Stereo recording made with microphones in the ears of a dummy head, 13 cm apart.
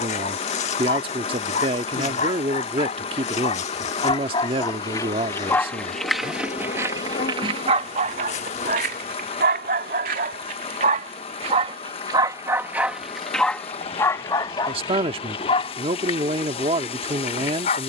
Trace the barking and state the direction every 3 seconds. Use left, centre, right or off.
left, left, right, right, centre, left.